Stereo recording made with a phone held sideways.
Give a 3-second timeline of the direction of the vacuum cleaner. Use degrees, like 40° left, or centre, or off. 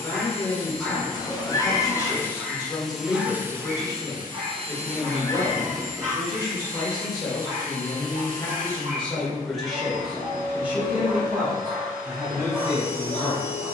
20° left, 30° right, 60° right, 60° right, 60° right.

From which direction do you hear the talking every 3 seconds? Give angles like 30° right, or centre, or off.
30° left, 30° left, 20° left, 10° right, 20° right.